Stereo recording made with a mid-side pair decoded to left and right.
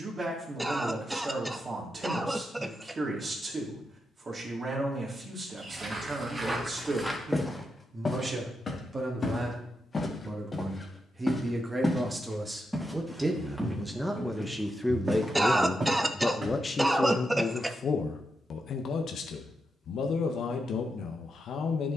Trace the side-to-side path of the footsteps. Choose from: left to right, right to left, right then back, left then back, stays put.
left then back.